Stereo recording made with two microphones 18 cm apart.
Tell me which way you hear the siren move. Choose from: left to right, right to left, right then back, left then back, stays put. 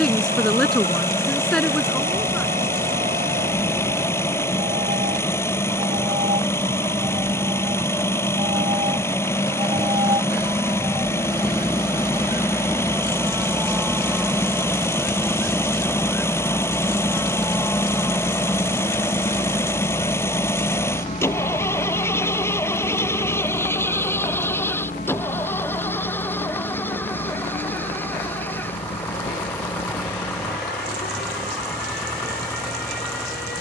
right to left.